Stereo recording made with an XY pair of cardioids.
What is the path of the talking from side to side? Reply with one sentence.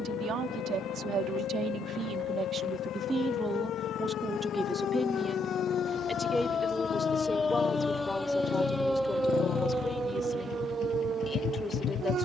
In this clip you hear the talking move from right to left.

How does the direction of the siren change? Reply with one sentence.
In this clip you hear the siren go from the left side to the right.